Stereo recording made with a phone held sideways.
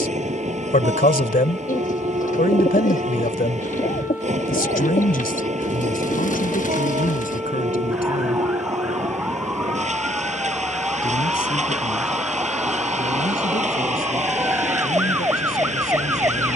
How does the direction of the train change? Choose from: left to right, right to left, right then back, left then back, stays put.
stays put.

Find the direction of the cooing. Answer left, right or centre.
left.